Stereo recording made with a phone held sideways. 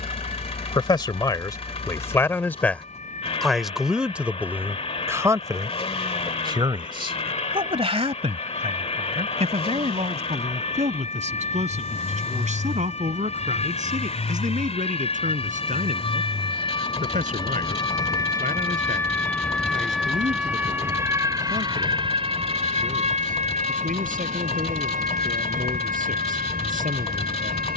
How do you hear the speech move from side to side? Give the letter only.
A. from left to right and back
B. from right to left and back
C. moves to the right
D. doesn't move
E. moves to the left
C.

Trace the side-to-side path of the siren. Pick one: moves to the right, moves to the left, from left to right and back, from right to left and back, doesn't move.
moves to the right.